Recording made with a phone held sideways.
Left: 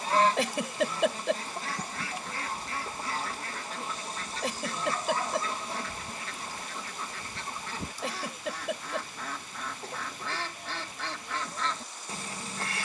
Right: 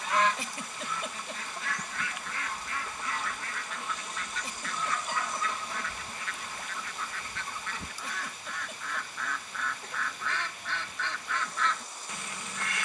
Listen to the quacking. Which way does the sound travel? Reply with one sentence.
You can hear the quacking stay put.